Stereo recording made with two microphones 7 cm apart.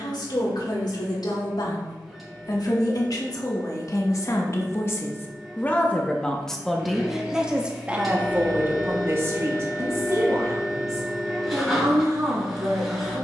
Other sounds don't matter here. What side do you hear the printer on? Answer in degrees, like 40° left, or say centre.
centre.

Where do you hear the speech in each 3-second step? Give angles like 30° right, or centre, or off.
70° left, 40° left, 10° right, 40° right, 50° right.